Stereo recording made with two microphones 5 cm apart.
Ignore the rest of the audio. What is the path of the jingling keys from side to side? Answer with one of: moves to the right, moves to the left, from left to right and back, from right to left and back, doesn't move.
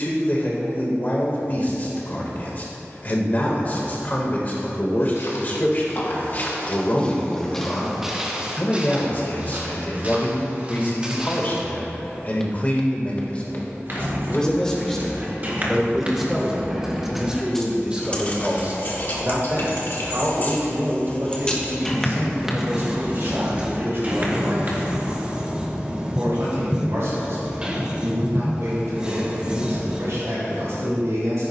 from right to left and back.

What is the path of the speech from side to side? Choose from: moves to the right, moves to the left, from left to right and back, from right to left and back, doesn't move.
moves to the right.